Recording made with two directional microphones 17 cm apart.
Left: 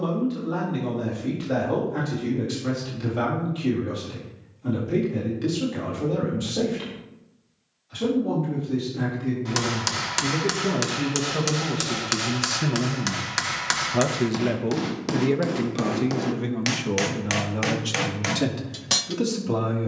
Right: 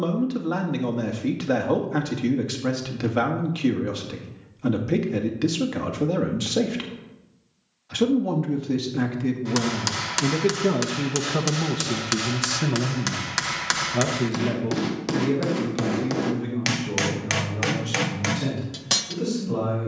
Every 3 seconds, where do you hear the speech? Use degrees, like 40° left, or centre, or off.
60° right, 60° right, 60° right, 40° right, 10° left, 50° left, 60° left.